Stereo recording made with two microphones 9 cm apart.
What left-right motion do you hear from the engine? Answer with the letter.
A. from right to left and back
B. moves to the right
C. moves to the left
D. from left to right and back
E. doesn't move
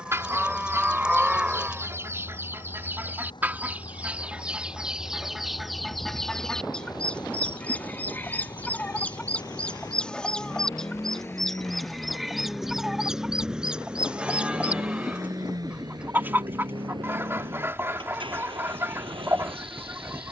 B.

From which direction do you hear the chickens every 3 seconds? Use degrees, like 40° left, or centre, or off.
30° right, 10° right, 10° left, 10° left, 10° right, 30° right, 30° right.